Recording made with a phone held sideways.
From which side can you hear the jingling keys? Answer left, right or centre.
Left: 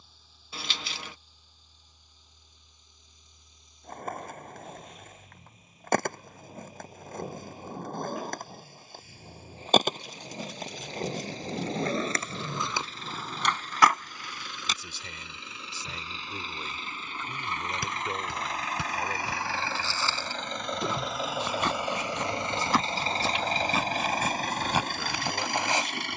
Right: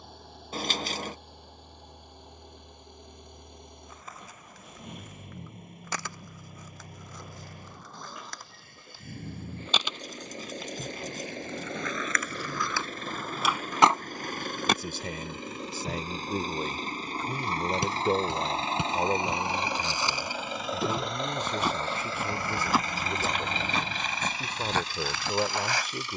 right.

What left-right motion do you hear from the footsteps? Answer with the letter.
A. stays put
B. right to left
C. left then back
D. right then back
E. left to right
B.